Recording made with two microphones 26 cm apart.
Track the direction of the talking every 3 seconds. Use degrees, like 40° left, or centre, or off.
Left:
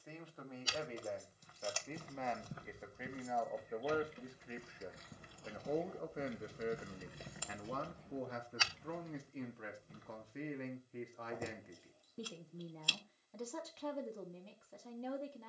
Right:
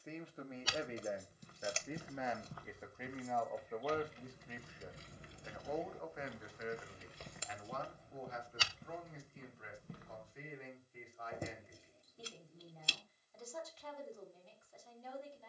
10° right, 20° left, 50° left, 60° left, 70° left.